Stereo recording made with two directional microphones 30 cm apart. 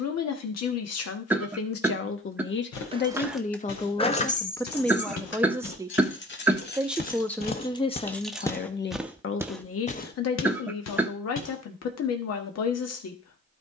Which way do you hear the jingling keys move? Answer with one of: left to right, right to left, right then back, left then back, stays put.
left then back.